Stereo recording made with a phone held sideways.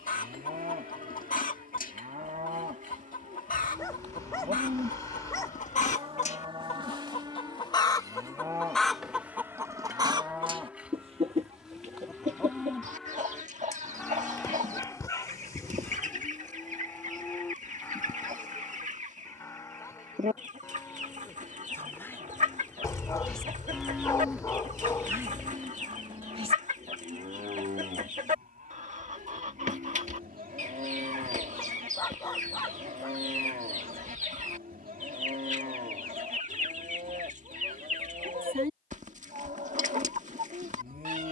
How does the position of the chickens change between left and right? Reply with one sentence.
You can hear the chickens move from left to right.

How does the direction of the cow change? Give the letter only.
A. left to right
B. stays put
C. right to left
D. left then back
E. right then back
D.